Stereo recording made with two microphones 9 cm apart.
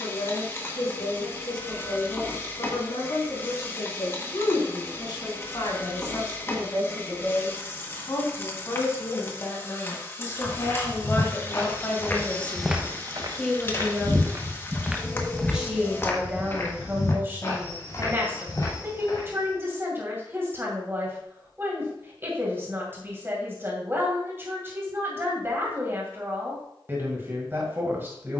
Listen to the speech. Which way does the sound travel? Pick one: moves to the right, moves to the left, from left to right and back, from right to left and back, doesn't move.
moves to the right.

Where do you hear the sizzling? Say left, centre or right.
left.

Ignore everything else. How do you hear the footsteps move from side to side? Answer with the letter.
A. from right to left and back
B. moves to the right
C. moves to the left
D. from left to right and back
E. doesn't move
D.